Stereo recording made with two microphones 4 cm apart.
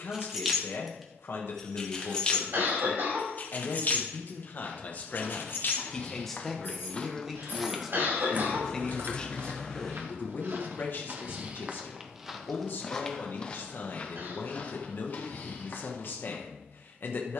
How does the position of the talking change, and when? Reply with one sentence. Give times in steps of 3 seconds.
In this clip you hear the talking on the left from 0 s, in the centre from 6 s and on the left from 9 s.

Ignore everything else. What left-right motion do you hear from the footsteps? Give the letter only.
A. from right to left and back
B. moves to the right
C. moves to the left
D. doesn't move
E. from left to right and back
E.